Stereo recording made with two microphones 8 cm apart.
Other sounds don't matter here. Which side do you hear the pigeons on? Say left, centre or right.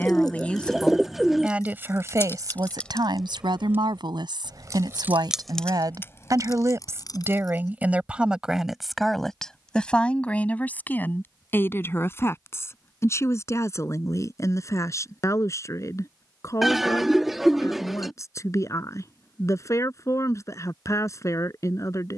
centre.